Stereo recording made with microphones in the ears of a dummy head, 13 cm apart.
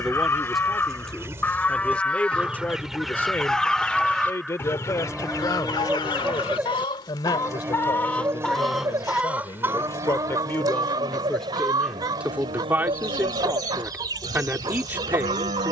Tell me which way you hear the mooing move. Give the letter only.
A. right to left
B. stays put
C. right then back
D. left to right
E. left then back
D.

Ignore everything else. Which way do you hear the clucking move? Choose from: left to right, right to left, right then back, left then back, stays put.
left then back.